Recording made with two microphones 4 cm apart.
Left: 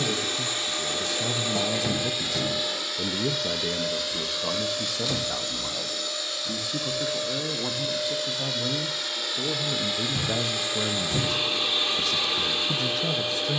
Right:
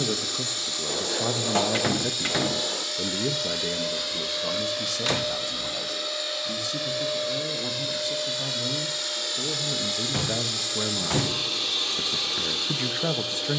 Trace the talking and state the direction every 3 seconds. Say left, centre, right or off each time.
right, centre, left, centre, right.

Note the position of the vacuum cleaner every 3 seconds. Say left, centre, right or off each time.
left, centre, centre, left, left.